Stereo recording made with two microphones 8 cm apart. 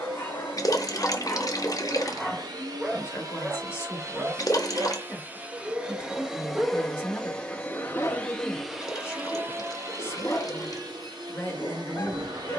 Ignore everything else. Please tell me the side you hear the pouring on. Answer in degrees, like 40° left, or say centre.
50° left.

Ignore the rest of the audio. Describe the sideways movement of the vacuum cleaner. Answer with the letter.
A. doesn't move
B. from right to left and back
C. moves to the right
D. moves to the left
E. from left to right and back
B.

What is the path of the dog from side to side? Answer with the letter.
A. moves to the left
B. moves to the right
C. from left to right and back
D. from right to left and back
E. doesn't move
C.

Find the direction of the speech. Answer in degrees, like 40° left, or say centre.
30° left.